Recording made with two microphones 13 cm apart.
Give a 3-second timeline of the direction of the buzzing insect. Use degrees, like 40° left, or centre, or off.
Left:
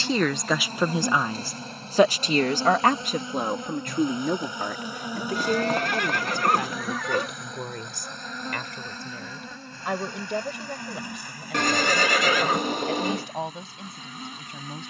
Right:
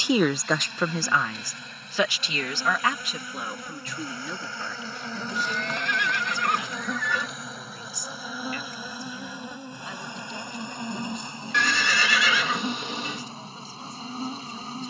40° left, 20° left, centre, 20° right, 30° right.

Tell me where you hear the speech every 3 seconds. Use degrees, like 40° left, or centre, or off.
20° left, 50° left, 60° left, 70° left, 70° left.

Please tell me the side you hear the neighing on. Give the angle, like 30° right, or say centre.
50° left.